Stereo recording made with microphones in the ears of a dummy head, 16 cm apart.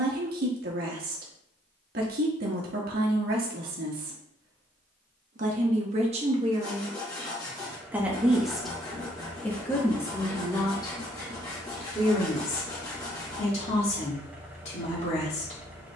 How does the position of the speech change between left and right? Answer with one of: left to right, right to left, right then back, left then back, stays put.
right to left.